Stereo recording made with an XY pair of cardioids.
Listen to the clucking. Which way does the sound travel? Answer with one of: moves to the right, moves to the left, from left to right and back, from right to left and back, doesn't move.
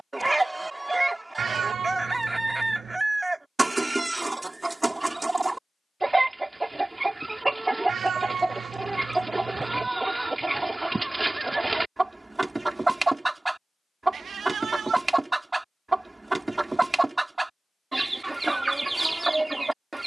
doesn't move.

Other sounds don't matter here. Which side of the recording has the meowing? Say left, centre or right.
right.